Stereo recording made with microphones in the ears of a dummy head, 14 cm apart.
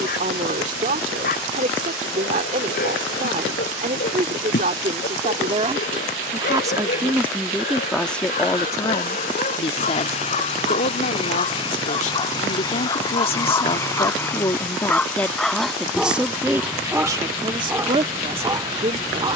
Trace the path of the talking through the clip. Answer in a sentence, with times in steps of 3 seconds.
You can hear the talking on the right from 0 s, in the centre from 6 s, on the left from 9 s, in the centre from 15 s and on the right from 18 s.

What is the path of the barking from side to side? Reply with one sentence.
You can hear the barking travel towards the right.